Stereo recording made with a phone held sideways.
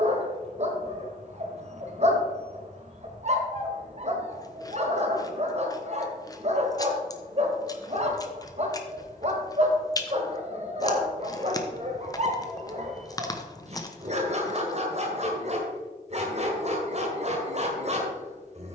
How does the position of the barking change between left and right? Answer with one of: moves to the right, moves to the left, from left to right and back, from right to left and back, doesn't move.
doesn't move.